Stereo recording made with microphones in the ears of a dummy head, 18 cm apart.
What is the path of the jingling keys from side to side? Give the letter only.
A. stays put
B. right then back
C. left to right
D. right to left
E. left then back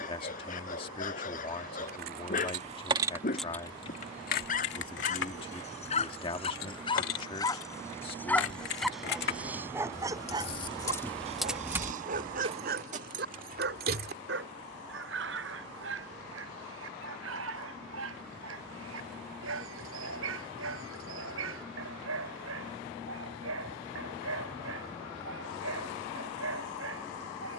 E.